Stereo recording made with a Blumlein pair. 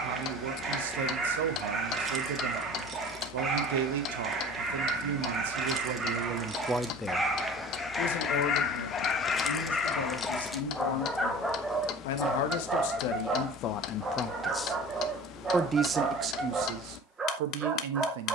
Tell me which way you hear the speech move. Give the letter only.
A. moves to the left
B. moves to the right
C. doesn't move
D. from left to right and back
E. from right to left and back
E.